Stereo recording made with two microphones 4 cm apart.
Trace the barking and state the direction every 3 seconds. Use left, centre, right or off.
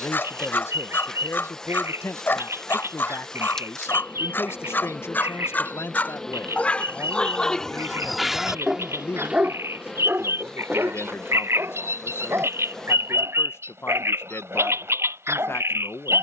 left, left, centre, right, right, right.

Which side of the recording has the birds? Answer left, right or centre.
right.